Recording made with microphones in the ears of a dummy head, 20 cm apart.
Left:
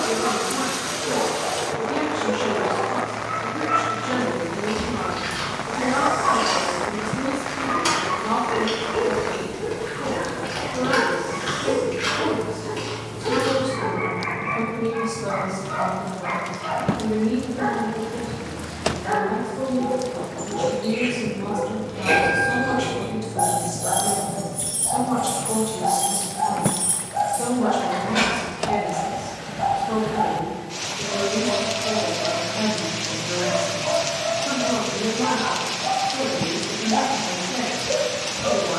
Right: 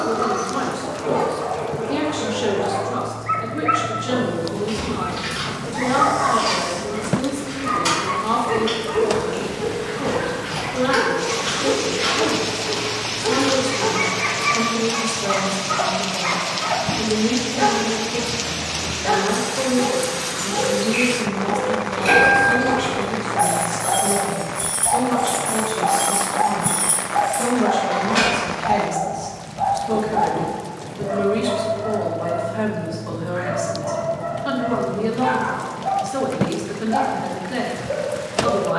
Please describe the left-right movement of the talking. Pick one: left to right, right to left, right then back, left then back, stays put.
left then back.